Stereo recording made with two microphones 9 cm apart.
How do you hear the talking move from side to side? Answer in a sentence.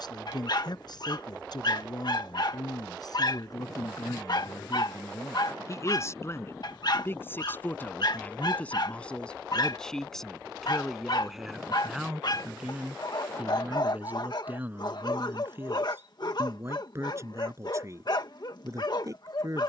You can hear the talking move to the right.